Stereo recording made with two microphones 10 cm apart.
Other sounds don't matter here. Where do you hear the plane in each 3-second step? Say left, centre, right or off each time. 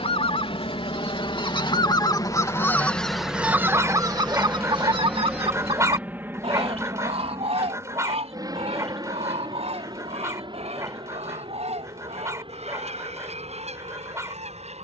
left, centre, right, right, right.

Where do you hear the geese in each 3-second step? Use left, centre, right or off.
left, right, right, right, right.